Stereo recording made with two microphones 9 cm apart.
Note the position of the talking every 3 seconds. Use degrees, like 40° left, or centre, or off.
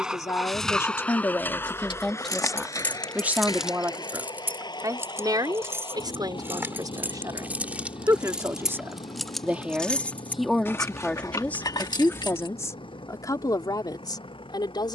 20° left, 30° right, 40° right, centre, 40° left.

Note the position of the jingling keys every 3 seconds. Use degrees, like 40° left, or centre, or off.
40° left, 20° right, 20° right, 30° left, 60° left.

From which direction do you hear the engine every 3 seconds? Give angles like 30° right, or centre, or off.
20° left, 50° left, 60° left, 60° left, 70° left.